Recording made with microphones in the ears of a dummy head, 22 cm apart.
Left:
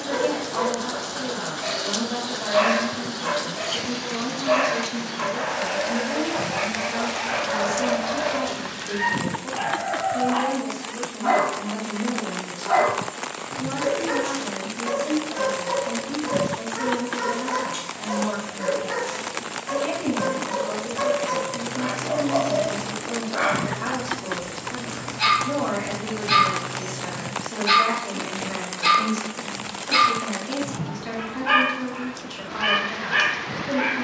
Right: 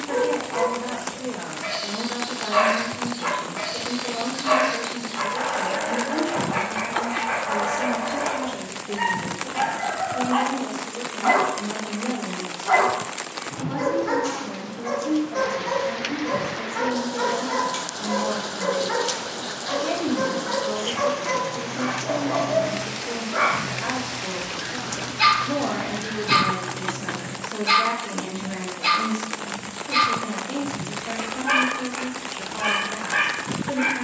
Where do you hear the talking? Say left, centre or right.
left.